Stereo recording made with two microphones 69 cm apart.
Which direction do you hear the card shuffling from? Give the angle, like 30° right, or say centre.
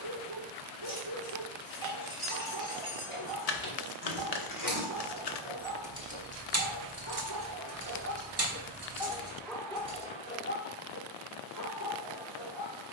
70° left.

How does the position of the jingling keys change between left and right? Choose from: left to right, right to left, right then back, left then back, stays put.
left to right.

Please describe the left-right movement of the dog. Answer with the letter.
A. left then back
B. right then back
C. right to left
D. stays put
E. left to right
C.